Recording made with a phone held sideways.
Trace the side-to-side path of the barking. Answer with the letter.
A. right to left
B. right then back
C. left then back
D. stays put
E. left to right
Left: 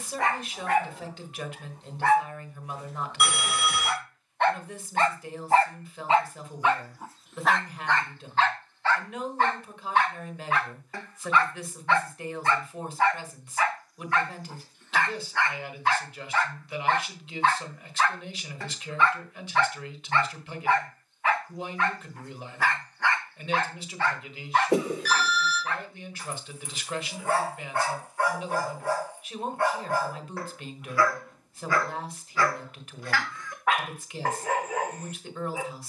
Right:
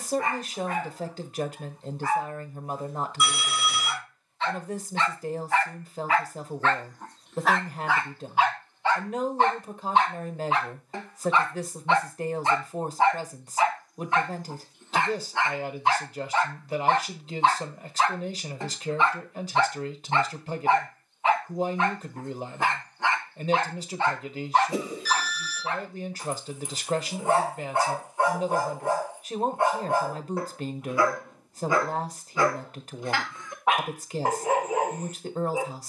E.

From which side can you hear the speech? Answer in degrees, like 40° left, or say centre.
40° right.